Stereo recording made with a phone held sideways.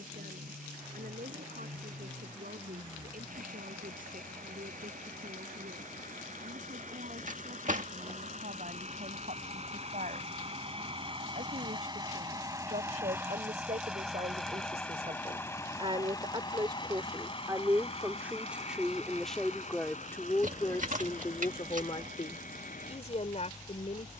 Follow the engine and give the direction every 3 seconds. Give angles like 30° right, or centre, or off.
70° right, 70° right, 60° right, 40° right, 10° right, 30° left, 50° left, 60° left.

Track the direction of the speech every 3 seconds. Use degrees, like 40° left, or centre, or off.
70° right, 70° right, 70° right, 60° right, 50° right, 30° right, 10° left, 40° left.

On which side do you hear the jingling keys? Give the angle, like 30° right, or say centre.
60° right.